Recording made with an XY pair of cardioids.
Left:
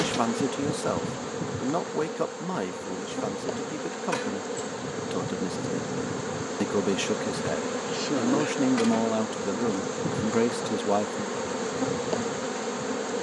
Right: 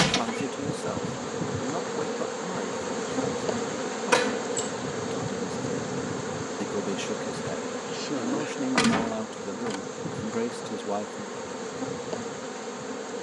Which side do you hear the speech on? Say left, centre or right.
left.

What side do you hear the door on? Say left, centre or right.
right.